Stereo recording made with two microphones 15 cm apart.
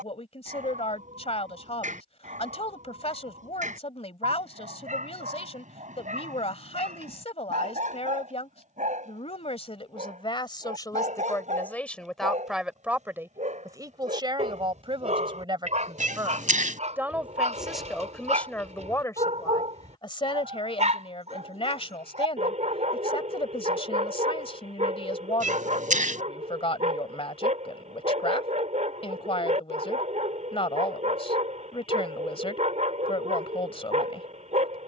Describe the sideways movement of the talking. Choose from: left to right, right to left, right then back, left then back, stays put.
right then back.